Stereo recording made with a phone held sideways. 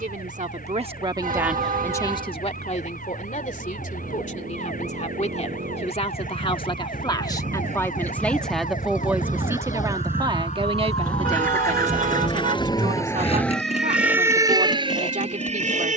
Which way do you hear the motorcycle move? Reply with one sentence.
In this clip you hear the motorcycle move to the left.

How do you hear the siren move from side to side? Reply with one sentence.
In this clip you hear the siren move to the right.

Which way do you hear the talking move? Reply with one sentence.
You can hear the talking move from right to left and back again.